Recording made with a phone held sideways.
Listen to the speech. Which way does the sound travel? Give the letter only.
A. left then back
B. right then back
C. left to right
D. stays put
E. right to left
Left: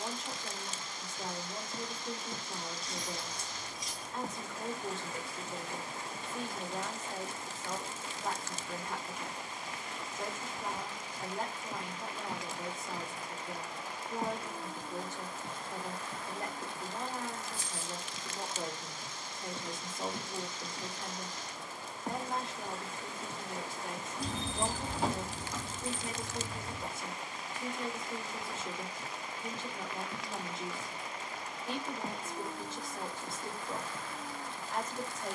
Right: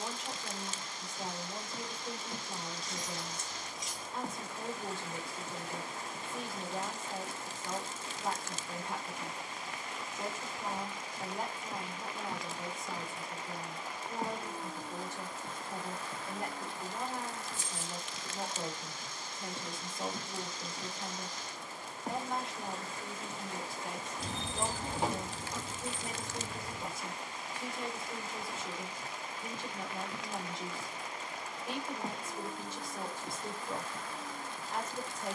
D.